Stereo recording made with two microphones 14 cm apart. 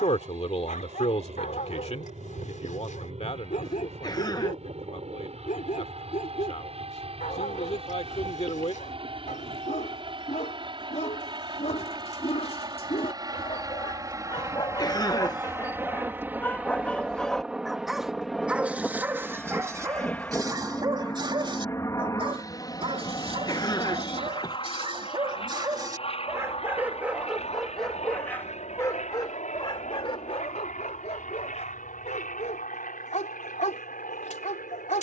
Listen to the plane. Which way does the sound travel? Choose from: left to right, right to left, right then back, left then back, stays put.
right to left.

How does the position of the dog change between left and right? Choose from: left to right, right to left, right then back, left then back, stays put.
right then back.